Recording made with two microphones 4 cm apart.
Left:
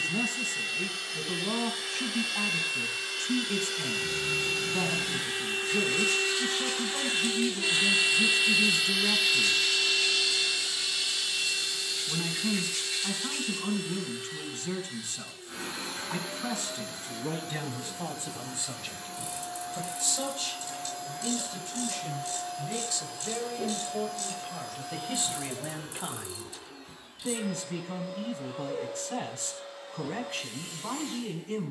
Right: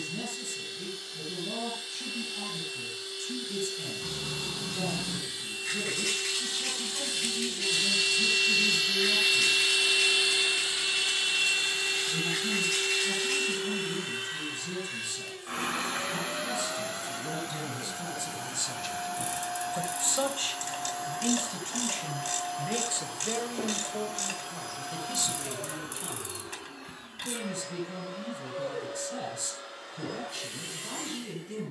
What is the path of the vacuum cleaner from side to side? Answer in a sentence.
In this clip you hear the vacuum cleaner go from the left side to the right.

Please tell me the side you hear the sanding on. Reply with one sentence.
You can hear the sanding on the right.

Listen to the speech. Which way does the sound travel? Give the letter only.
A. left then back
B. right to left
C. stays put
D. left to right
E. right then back
E.